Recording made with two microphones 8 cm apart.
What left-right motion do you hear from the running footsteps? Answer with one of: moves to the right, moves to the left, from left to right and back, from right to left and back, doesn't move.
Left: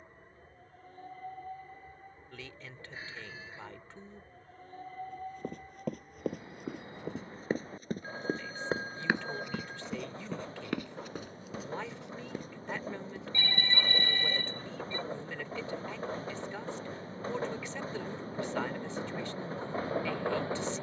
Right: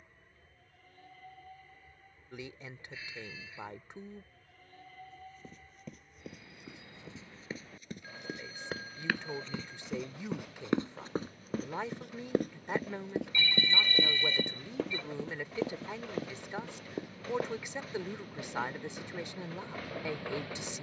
moves to the right.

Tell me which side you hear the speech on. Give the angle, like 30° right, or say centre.
20° right.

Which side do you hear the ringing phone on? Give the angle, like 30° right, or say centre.
40° left.